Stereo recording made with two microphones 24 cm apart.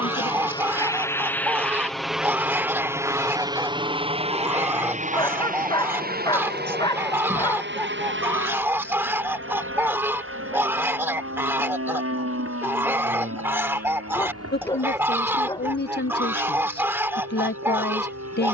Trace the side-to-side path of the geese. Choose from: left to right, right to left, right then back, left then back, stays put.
stays put.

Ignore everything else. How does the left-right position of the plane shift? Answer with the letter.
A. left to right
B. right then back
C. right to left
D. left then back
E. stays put
A.